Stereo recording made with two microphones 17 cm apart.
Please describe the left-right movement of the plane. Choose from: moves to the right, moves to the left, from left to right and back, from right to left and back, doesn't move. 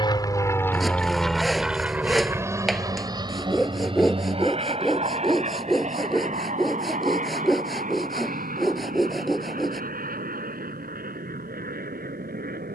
moves to the right.